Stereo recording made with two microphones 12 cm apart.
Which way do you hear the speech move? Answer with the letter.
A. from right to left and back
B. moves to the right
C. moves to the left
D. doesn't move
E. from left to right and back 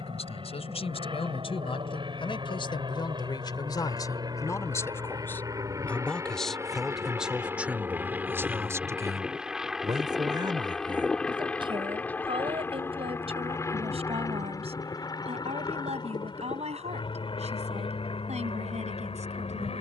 B.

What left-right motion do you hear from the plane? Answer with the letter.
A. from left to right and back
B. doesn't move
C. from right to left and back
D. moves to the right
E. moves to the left
E.